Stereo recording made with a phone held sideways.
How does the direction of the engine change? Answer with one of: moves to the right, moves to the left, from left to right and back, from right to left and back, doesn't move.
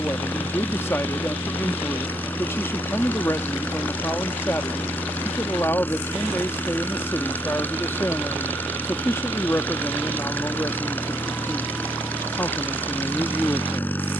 doesn't move.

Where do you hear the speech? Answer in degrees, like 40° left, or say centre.
20° left.